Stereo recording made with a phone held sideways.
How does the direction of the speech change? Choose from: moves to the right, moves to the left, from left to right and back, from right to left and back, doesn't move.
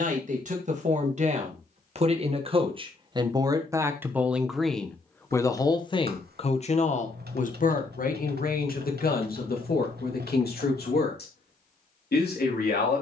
moves to the left.